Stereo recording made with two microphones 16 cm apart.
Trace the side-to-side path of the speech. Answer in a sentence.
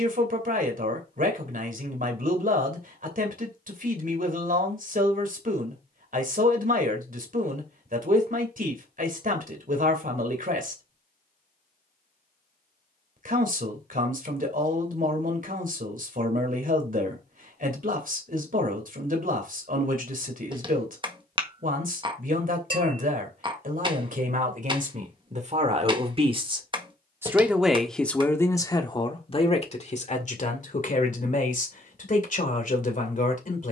You can hear the speech move to the left.